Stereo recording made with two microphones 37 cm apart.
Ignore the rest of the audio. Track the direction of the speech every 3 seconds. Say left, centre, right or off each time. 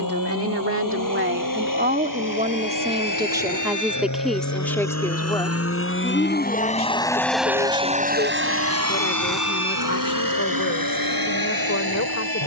right, centre, left, left.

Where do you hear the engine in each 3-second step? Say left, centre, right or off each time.
left, left, centre, right.